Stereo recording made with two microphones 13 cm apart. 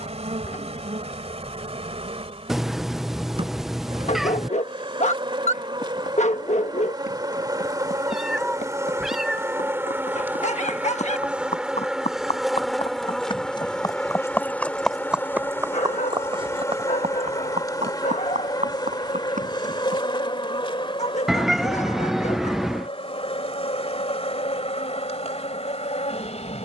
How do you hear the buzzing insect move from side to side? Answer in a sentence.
In this clip you hear the buzzing insect travel towards the left.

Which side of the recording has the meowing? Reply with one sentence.
In this clip you hear the meowing in the centre.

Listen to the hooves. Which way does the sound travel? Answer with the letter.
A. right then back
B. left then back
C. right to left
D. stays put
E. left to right
E.